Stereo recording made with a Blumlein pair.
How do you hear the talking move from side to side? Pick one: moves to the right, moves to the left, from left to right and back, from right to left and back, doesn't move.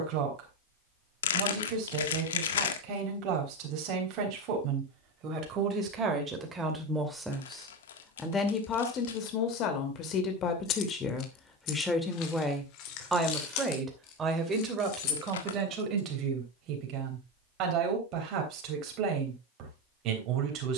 from right to left and back.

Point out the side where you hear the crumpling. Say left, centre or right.
left.